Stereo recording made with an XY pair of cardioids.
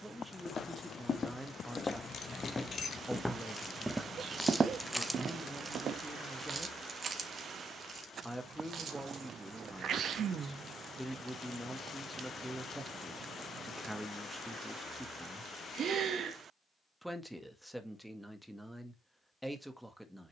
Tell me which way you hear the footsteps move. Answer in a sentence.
You can hear the footsteps travel towards the right.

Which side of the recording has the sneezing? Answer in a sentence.
In this clip you hear the sneezing on the right.